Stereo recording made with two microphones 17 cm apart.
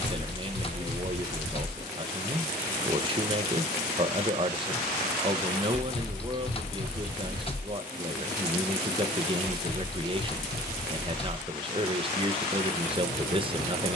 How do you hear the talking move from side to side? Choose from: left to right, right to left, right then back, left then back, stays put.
stays put.